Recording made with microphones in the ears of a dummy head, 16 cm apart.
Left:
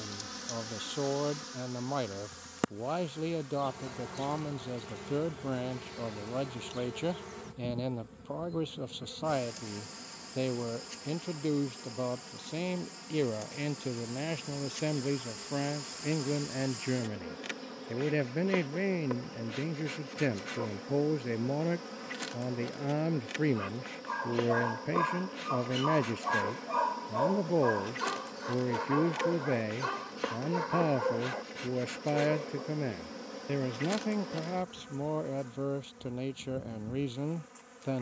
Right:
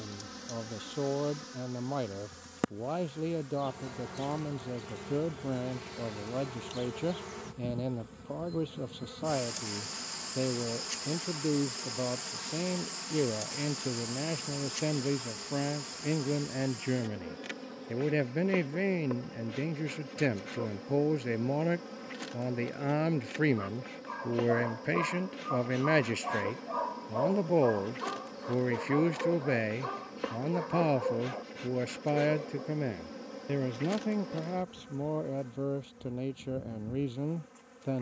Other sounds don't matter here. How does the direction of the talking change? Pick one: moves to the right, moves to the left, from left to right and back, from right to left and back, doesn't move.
from left to right and back.